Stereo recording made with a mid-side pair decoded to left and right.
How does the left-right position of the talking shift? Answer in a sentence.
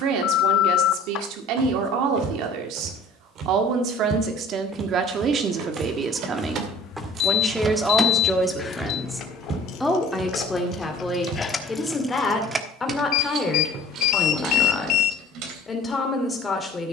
You can hear the talking travel towards the left.